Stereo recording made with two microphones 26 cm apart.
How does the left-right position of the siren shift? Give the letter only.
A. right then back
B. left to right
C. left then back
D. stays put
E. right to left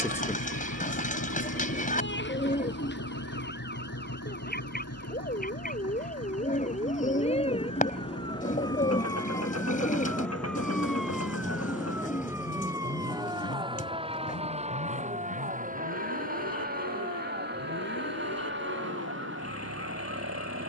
B.